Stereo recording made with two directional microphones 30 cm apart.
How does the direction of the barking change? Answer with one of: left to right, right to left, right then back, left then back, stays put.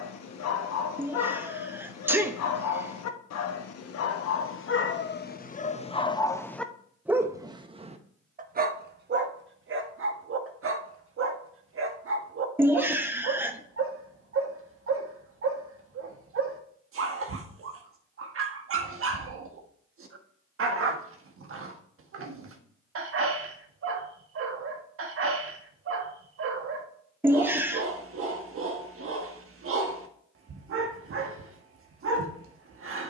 left to right.